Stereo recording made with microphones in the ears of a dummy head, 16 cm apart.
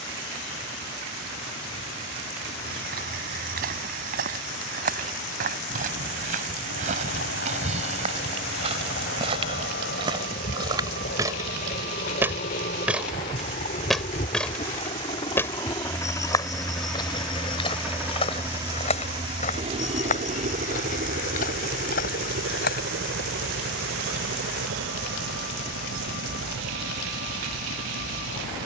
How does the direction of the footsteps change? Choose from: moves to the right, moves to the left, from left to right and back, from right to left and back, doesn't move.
moves to the left.